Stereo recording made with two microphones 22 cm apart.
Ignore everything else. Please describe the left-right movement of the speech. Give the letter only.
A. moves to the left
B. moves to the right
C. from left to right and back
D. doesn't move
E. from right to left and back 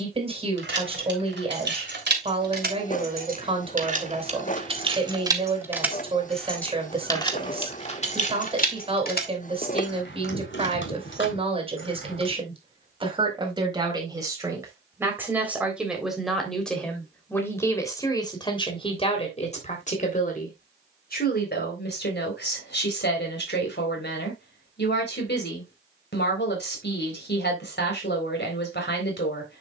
A.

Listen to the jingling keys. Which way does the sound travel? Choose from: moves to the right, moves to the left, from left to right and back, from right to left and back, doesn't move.
moves to the left.